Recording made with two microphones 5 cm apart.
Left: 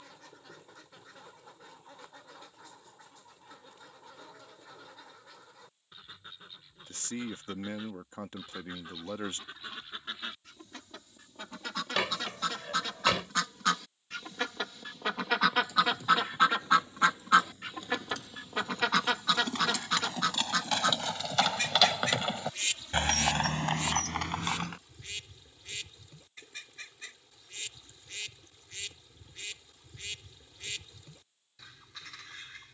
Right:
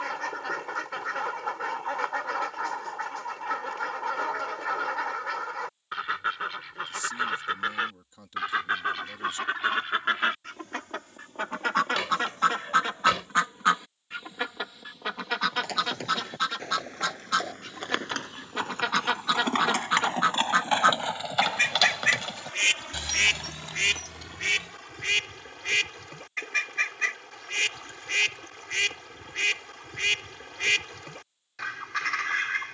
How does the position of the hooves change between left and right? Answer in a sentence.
In this clip you hear the hooves move from right to left.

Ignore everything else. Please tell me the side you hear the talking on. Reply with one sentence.
You can hear the talking on the left.